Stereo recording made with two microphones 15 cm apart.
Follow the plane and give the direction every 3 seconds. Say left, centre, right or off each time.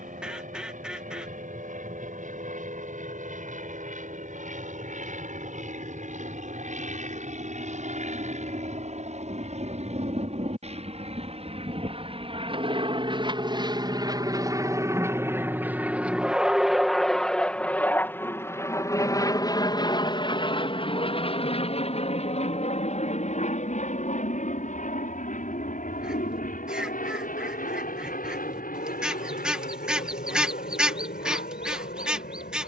right, right, right, right, right, centre, left, left, left, left, left.